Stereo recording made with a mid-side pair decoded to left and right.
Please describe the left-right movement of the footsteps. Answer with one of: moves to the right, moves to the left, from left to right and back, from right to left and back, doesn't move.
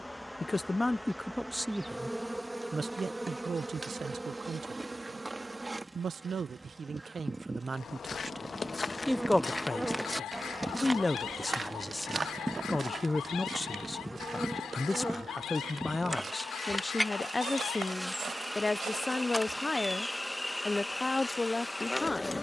moves to the right.